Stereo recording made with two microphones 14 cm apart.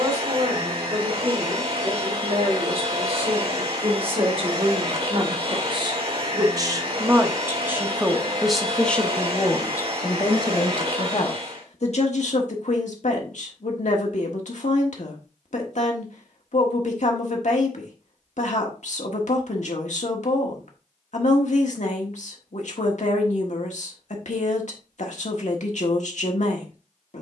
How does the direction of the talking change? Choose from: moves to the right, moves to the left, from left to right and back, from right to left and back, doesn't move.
moves to the left.